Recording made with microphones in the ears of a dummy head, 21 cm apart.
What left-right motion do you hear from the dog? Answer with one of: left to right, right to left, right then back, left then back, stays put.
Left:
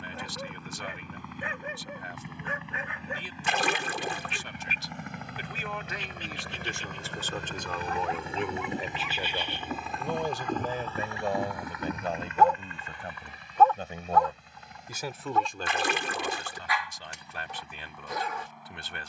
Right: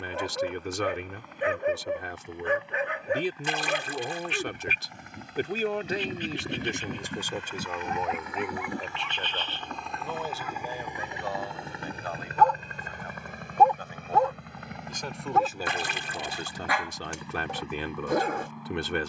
left then back.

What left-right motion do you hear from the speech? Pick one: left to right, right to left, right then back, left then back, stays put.
left then back.